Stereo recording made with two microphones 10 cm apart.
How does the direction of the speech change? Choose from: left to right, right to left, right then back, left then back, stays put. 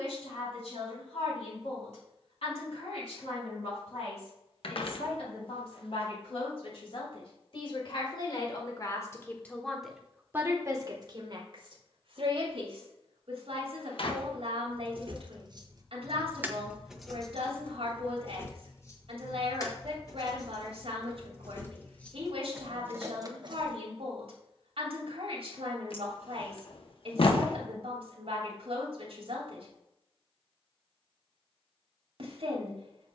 left to right.